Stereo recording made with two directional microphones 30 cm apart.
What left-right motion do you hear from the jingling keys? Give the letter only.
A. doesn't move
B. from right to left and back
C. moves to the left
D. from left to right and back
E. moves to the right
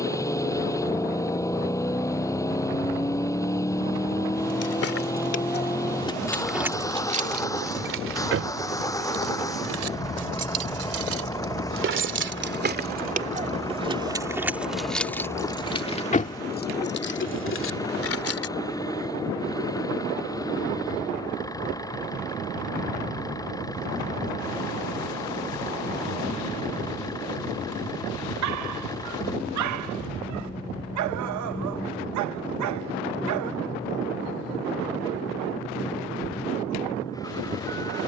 D.